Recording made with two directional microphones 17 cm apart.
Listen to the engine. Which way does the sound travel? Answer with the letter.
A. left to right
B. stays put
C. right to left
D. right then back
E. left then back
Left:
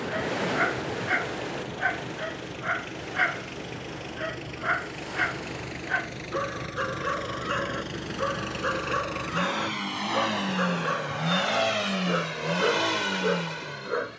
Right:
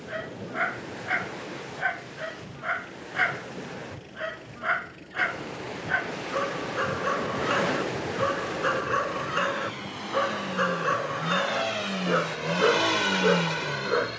A.